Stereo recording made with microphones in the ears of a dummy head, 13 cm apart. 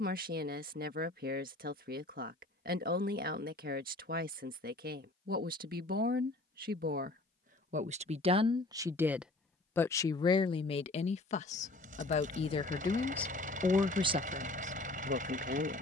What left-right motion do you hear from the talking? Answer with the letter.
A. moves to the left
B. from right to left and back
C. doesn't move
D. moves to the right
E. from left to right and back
B.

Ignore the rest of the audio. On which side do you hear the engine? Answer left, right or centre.
right.